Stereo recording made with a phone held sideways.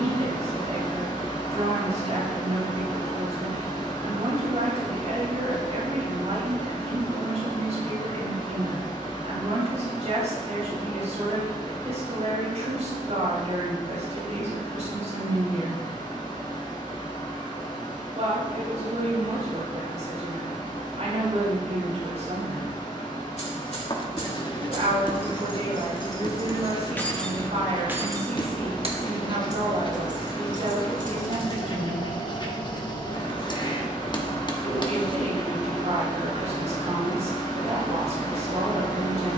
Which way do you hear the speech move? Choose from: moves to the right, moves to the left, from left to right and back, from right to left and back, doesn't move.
doesn't move.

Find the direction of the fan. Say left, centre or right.
left.